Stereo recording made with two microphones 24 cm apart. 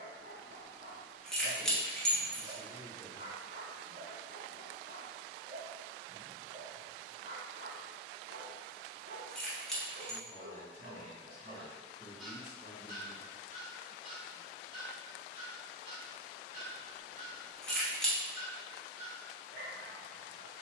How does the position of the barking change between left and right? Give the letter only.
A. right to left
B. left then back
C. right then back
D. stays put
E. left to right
B.